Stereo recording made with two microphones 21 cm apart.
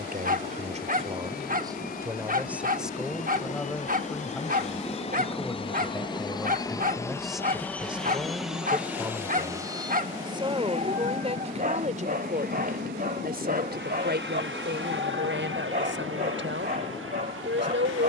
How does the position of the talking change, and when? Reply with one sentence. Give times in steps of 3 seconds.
In this clip you hear the talking on the right from 0 s, in the centre from 3 s and on the right from 9 s.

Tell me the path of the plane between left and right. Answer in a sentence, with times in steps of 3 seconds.
You can hear the plane on the left from 0 s, in the centre from 6 s and on the right from 9 s.